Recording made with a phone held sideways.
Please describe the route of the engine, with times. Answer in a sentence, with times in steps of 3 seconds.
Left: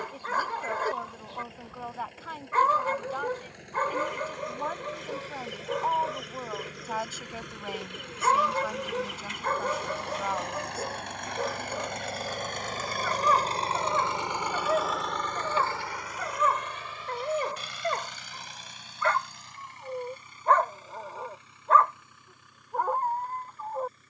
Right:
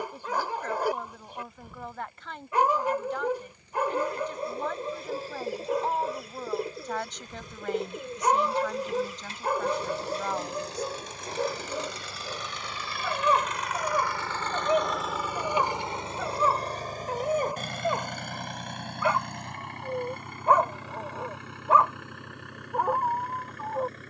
You can hear the engine on the left from 0 s and on the right from 15 s.